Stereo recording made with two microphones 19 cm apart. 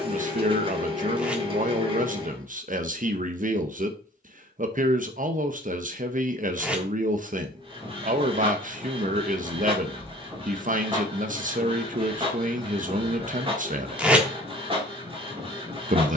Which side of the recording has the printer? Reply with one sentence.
In this clip you hear the printer on the right.